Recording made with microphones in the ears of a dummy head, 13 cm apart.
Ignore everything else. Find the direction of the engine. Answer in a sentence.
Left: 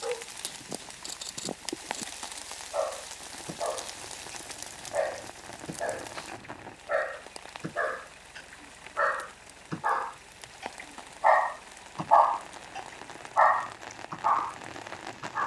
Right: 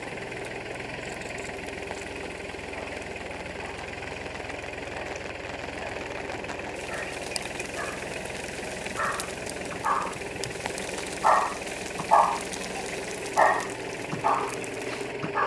You can hear the engine on the right.